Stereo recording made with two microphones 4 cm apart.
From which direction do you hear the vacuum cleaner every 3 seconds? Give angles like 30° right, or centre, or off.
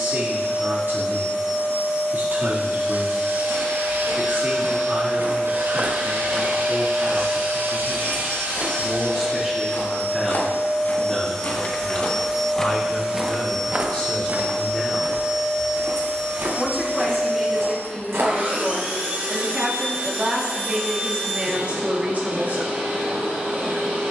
70° left, 60° left, 40° left, 20° left, 10° right, 30° right, 40° right, 50° right.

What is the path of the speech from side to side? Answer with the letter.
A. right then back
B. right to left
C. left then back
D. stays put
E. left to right
C.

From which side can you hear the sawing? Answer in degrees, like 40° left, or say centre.
70° right.